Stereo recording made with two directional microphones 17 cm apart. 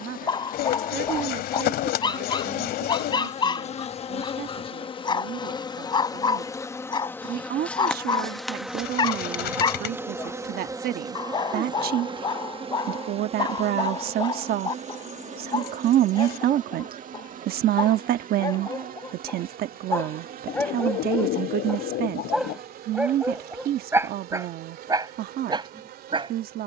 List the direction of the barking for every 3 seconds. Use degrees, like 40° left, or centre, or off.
30° left, 30° left, 30° left, 30° left, 30° left, 30° left, 20° left, 10° right, 20° right.